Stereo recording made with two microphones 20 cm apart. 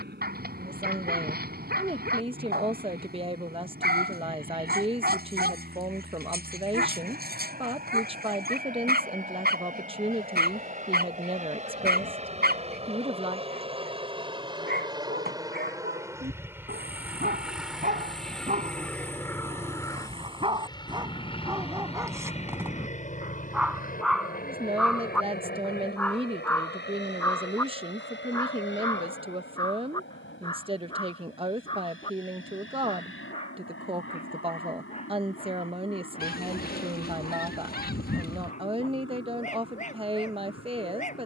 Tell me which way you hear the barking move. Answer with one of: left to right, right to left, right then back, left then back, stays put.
right to left.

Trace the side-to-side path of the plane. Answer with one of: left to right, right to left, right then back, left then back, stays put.
right to left.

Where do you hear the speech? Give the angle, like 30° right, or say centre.
30° right.